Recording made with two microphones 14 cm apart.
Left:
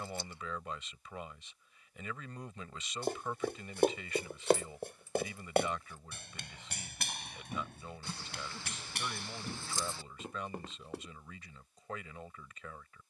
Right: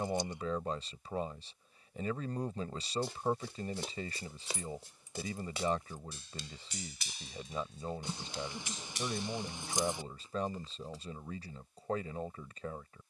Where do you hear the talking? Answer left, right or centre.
right.